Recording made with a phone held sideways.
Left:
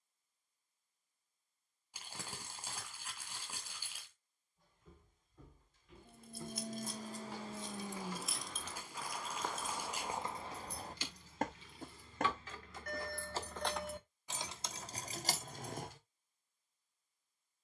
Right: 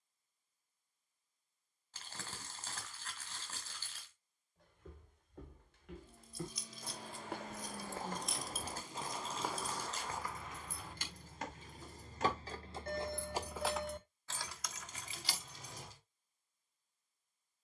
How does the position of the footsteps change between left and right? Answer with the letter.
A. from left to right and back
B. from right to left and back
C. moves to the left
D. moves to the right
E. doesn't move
C.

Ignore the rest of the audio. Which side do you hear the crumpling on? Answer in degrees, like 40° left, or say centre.
10° left.